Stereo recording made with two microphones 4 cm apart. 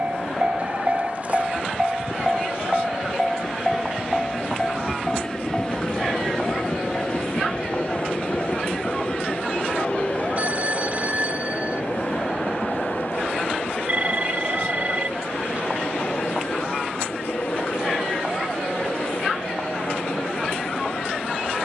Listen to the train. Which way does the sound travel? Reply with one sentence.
In this clip you hear the train move from right to left.